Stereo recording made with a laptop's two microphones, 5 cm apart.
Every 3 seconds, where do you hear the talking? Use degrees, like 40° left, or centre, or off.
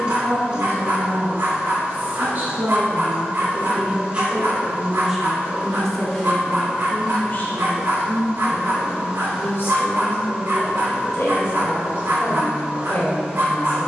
40° right, 10° right, 40° left, 60° left, 60° left.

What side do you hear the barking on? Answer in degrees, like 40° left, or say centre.
70° right.